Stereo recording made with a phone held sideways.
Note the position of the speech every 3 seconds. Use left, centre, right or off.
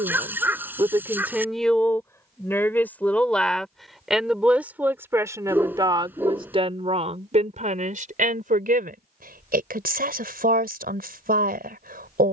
centre, centre, right, right.